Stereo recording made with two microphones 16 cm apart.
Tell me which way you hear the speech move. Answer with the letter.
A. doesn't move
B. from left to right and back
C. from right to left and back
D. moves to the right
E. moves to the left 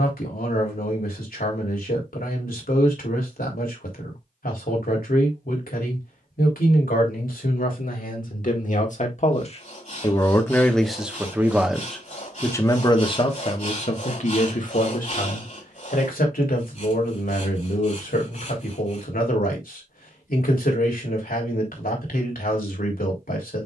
B.